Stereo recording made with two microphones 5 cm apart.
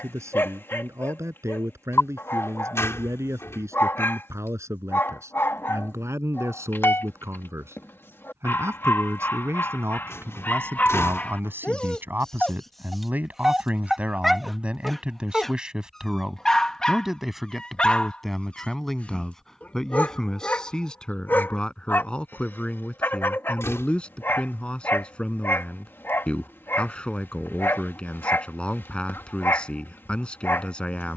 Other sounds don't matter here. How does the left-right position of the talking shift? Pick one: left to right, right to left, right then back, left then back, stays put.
right to left.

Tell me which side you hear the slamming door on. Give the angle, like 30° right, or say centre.
60° left.